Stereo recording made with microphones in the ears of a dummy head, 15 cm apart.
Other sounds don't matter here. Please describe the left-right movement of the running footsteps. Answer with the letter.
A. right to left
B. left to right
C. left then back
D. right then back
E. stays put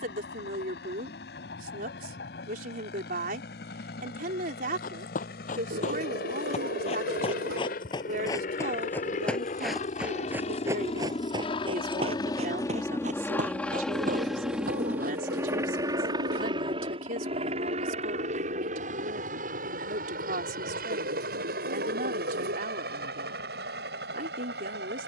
B.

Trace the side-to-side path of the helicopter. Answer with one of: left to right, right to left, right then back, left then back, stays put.
left to right.